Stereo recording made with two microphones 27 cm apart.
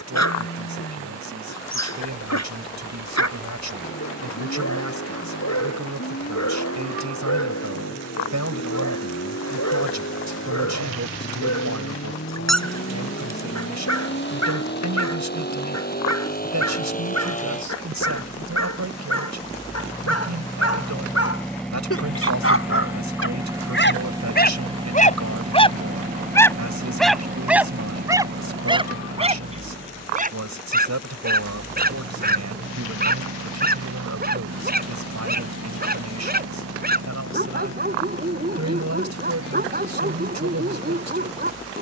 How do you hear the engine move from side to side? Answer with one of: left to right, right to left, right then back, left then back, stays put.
left to right.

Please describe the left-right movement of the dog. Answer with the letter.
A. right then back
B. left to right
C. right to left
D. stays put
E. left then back
B.